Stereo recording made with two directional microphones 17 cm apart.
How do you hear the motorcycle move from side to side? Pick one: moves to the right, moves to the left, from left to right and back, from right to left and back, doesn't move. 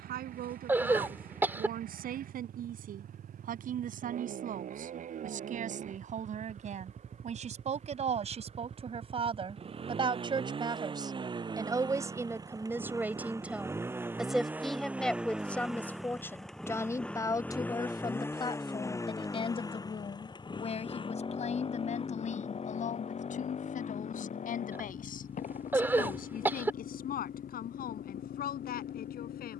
moves to the left.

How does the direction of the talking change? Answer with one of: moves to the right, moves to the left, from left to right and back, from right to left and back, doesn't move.
moves to the left.